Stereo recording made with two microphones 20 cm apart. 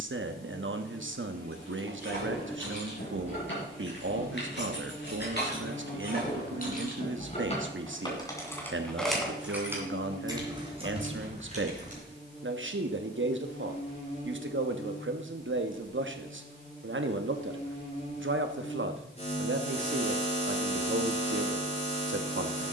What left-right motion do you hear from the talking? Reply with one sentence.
You can hear the talking stay put.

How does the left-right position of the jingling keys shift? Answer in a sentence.
You can hear the jingling keys move to the right.